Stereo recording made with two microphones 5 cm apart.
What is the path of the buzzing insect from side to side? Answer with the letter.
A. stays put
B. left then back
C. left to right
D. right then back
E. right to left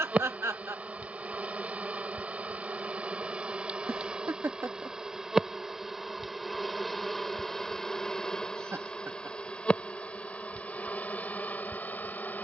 E.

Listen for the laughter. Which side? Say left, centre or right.
right.